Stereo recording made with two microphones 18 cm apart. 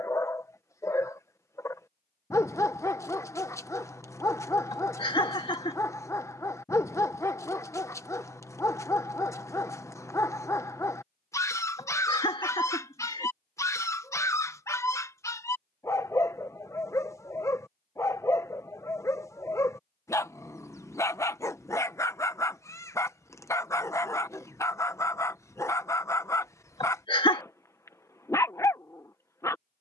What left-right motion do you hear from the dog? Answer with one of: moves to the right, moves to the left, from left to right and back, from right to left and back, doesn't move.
doesn't move.